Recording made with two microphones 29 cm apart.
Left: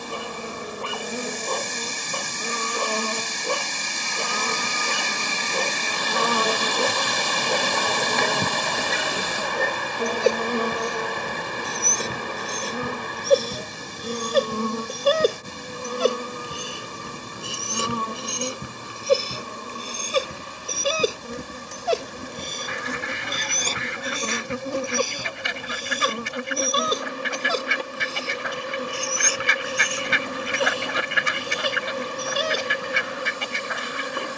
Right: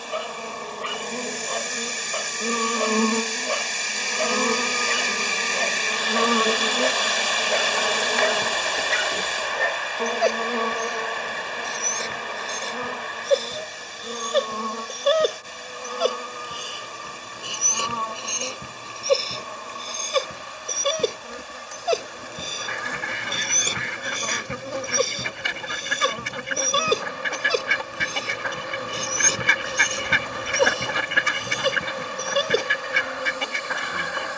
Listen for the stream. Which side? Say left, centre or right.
left.